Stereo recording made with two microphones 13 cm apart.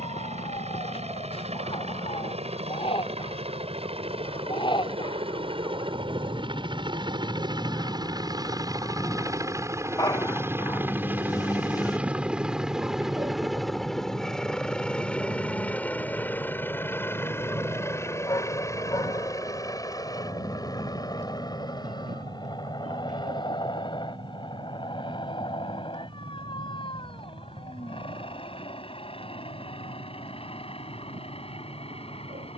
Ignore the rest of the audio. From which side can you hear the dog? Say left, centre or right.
left.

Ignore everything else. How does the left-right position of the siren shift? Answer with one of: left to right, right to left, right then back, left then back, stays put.
left to right.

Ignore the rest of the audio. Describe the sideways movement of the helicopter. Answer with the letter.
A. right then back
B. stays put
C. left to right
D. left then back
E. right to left
E.